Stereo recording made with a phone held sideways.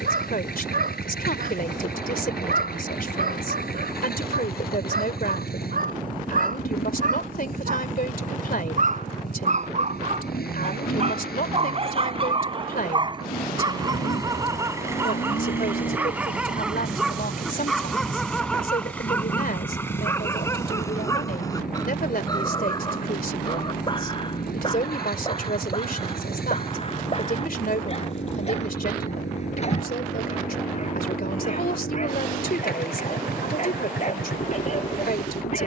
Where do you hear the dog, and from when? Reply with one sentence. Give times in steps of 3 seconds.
In this clip you hear the dog on the right from 0 s, in the centre from 15 s and on the left from 21 s.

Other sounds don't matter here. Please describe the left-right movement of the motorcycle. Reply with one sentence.
In this clip you hear the motorcycle stay in one place.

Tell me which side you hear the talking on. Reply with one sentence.
You can hear the talking on the left.